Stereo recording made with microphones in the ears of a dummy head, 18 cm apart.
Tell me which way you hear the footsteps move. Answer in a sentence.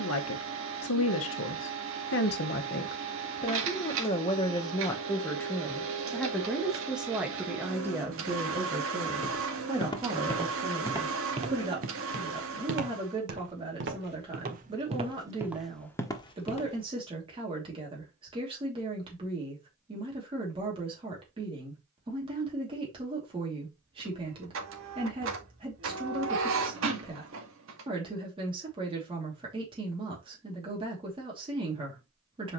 You can hear the footsteps move from left to right and back again.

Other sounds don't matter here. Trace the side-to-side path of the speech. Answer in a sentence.
In this clip you hear the speech move from left to right.